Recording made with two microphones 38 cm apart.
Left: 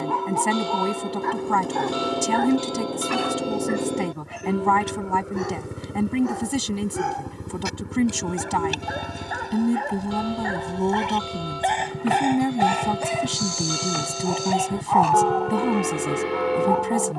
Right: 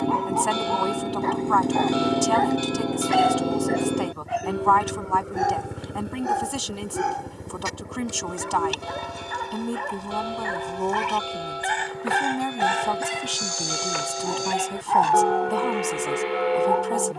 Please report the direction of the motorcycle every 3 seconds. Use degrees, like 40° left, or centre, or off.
30° right, 10° right, 20° left, 40° left, 50° left, 50° left.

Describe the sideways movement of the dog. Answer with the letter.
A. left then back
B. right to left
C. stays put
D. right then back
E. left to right
E.